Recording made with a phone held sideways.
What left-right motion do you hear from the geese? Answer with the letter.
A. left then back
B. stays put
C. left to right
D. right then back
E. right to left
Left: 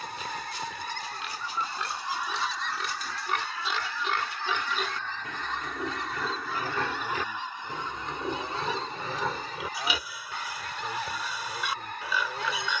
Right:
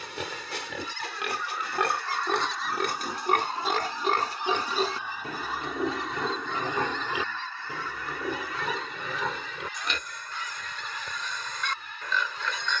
D.